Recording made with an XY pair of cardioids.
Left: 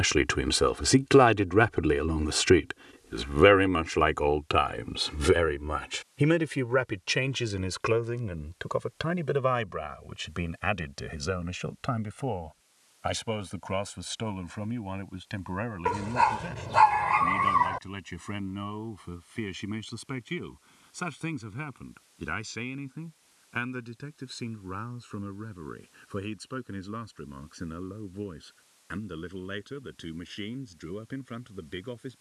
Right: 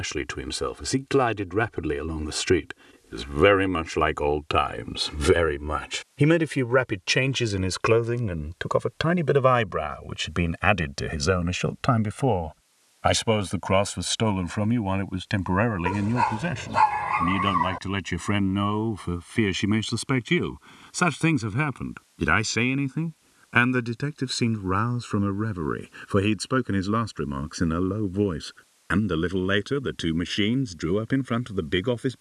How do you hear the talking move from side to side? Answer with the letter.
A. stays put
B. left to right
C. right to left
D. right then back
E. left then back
B.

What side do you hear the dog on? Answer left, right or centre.
centre.